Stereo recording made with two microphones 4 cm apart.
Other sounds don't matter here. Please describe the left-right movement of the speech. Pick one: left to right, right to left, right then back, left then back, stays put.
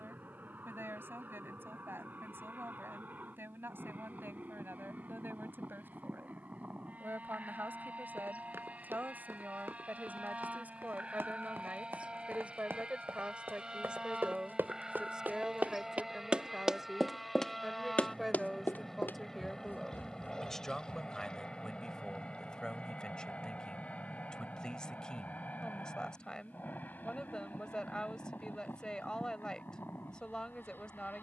right to left.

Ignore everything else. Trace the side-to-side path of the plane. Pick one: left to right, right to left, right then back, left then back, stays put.
right to left.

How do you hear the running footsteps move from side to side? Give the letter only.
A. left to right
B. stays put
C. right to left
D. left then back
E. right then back
C.